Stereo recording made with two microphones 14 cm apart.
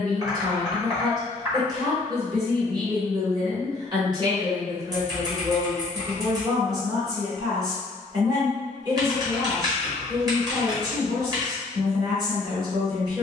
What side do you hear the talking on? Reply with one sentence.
In this clip you hear the talking on the right.